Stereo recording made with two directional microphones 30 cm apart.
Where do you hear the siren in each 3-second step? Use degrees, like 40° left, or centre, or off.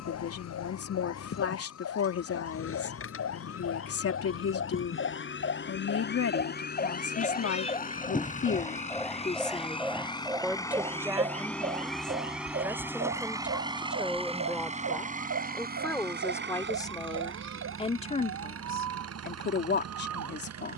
60° left, 50° left, 20° left, 10° right, 40° right, 60° right, 60° right.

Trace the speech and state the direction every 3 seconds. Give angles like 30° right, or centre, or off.
50° left, 50° left, 50° left, centre, centre, 10° left, 30° left.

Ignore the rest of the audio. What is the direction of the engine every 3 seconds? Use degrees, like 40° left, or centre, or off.
50° left, 40° left, 30° left, 10° left, 10° right, 40° right, 50° right.